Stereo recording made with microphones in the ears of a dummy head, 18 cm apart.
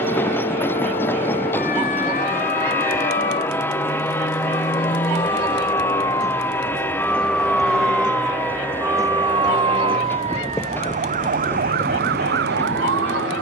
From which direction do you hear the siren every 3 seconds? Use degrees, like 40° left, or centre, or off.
40° left, 30° left, centre, 30° right, 50° right.